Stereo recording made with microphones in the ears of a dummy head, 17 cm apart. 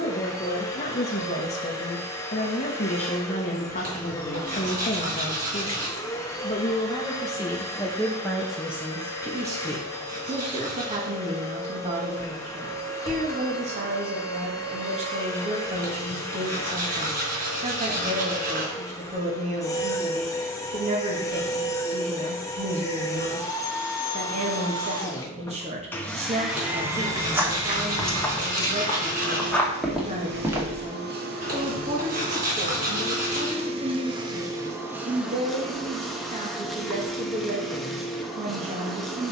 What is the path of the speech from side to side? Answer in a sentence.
In this clip you hear the speech move from left to right.